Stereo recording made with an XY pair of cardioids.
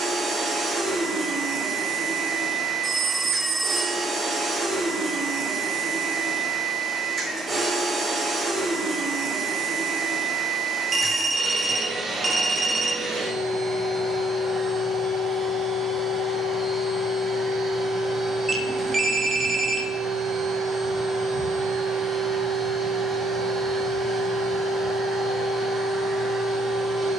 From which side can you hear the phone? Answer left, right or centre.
right.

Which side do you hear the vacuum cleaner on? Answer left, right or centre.
right.